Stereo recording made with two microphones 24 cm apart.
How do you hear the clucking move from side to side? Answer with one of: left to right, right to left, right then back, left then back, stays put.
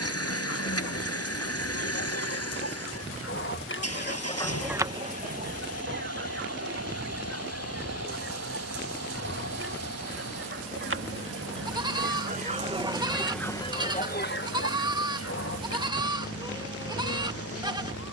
right then back.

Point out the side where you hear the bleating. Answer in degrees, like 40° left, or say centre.
20° right.